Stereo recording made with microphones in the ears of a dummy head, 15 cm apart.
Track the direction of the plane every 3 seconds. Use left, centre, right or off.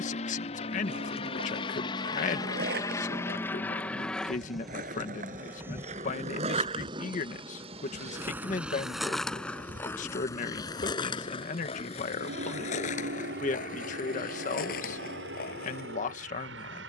left, centre, right, right, right, right.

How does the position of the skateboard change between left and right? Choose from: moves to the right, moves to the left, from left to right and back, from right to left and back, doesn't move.
moves to the left.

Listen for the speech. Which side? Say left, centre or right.
left.